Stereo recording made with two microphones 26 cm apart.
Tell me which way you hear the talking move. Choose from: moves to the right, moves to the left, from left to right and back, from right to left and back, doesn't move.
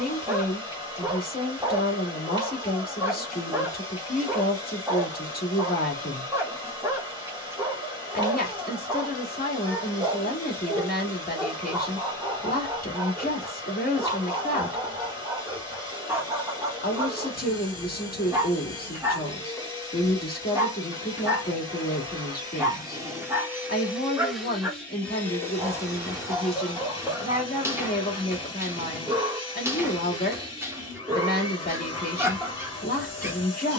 doesn't move.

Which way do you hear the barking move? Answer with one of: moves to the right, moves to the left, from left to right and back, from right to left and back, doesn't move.
doesn't move.